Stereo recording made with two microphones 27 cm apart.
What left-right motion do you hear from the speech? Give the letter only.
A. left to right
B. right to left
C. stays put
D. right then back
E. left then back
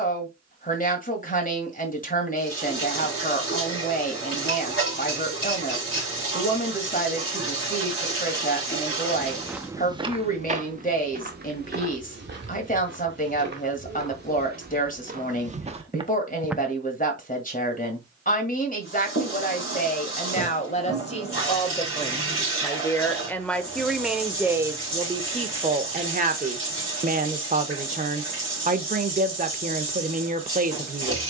A.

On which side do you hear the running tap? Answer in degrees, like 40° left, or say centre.
50° left.